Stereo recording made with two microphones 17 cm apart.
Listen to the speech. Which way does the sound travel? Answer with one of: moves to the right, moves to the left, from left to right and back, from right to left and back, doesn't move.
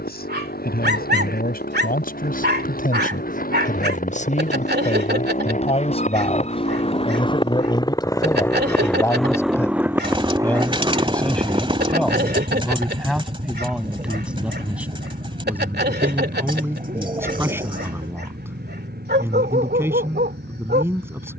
moves to the right.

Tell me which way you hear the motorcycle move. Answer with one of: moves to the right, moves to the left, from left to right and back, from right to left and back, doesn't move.
moves to the right.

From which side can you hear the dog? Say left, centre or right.
right.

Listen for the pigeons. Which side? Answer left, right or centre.
right.